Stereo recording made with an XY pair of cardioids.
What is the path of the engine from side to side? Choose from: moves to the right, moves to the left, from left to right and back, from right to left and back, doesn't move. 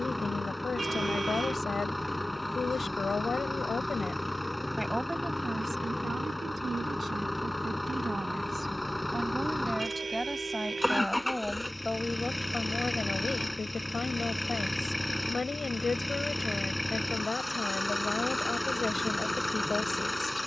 doesn't move.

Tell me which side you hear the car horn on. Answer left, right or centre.
right.